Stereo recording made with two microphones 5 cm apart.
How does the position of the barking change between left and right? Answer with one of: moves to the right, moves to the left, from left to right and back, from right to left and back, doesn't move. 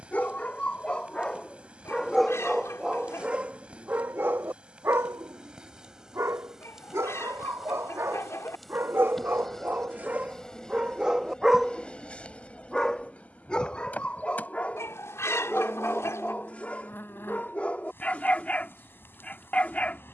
from left to right and back.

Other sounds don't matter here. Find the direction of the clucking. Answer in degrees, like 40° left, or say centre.
70° left.